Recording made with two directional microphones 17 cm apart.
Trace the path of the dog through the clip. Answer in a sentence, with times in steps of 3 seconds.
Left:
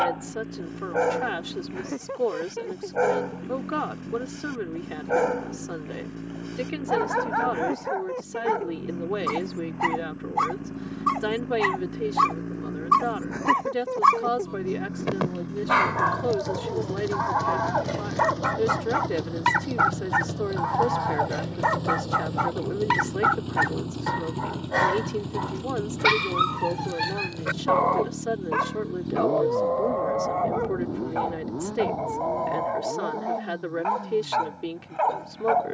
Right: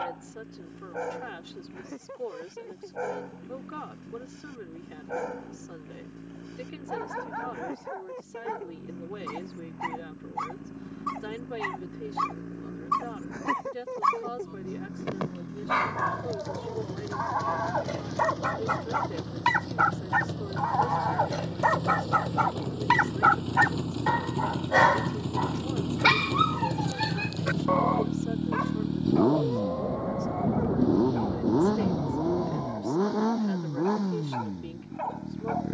You can hear the dog on the left from 0 s, in the centre from 18 s and on the left from 27 s.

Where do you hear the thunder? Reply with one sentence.
You can hear the thunder on the right.